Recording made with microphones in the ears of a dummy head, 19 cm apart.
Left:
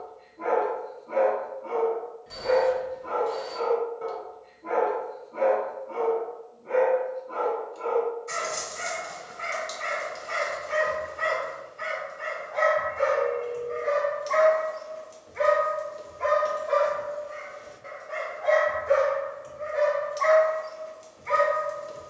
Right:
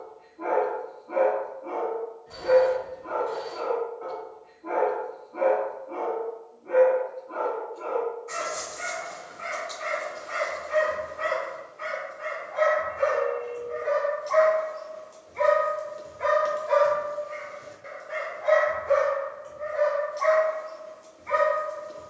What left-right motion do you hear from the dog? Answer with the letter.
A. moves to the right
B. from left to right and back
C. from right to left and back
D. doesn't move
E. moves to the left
B.